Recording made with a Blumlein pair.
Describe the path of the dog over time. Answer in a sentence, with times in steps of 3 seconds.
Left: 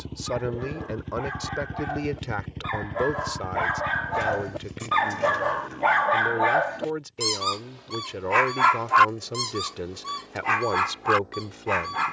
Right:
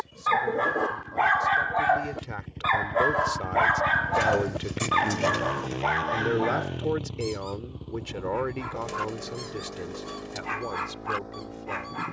You can hear the dog on the right from 0 s, in the centre from 3 s and on the left from 6 s.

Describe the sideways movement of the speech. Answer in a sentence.
In this clip you hear the speech move from left to right and back again.